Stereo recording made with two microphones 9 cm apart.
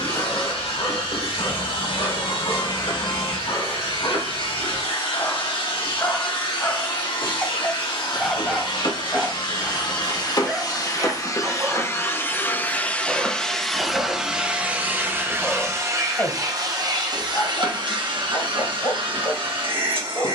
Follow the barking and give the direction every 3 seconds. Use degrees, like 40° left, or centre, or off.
40° left, 40° left, 10° left, 20° right, 10° right, 20° left, 40° left.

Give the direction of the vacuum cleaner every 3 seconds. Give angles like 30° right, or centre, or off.
70° left, 70° left, 60° left, 40° left, centre, 40° right, 60° right.